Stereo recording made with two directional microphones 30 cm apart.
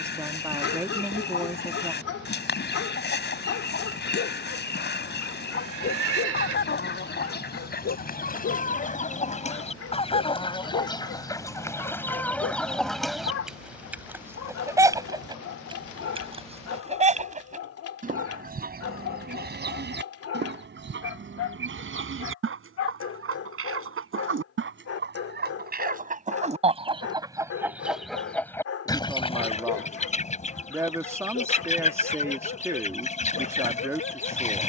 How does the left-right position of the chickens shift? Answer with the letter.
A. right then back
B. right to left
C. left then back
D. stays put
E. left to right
A.